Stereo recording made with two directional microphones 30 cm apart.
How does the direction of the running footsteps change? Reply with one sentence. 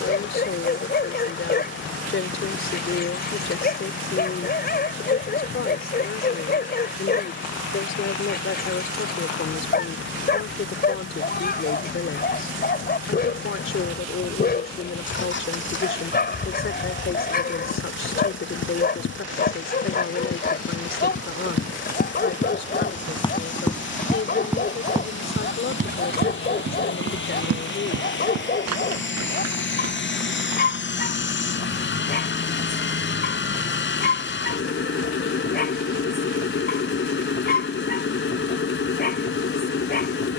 In this clip you hear the running footsteps move to the right.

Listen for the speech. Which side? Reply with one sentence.
In this clip you hear the speech on the left.